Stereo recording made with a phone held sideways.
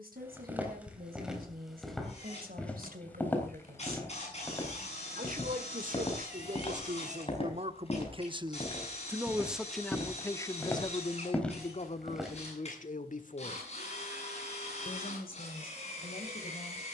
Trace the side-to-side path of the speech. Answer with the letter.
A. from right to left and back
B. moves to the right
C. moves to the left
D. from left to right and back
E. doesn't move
C.